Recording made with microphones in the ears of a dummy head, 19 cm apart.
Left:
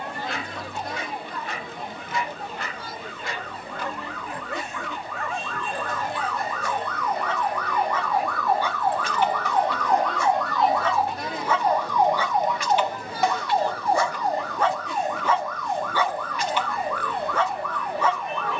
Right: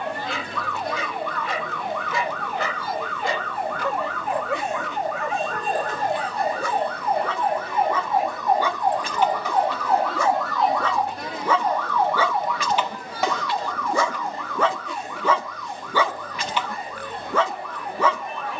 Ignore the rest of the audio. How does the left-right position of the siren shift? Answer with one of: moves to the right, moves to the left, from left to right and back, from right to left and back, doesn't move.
moves to the left.